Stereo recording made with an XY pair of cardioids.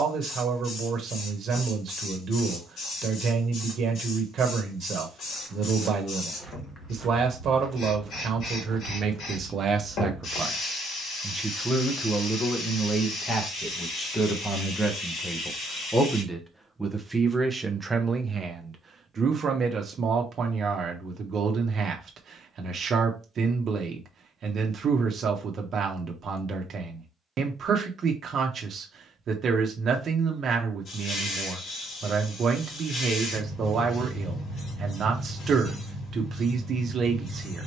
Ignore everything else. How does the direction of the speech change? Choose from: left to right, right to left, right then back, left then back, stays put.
left then back.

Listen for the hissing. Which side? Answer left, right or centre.
left.